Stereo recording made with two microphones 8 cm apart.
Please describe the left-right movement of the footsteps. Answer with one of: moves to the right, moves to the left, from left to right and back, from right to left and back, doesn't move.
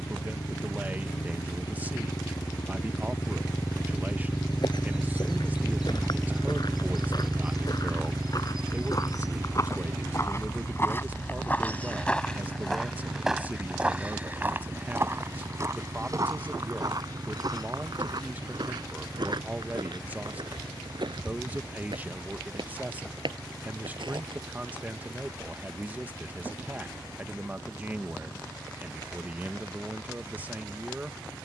moves to the right.